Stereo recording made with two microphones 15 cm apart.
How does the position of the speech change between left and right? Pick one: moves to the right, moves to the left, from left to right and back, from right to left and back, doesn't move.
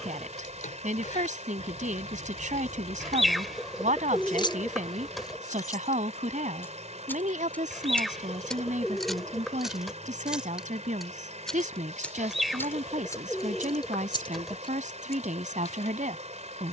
doesn't move.